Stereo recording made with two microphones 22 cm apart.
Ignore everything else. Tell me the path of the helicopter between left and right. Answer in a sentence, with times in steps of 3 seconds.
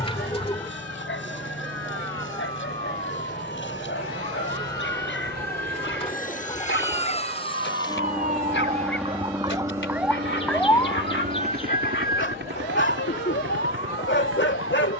You can hear the helicopter on the left from 0 s and on the right from 9 s.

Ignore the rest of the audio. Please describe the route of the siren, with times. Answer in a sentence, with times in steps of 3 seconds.
You can hear the siren on the right from 0 s, in the centre from 9 s and on the left from 12 s.